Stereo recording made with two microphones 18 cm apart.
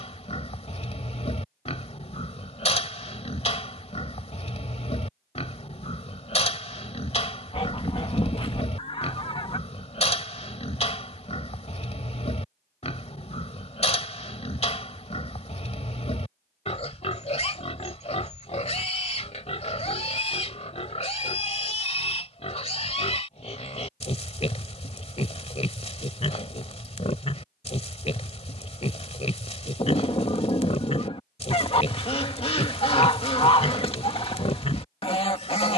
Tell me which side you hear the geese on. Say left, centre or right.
left.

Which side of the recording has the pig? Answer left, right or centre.
left.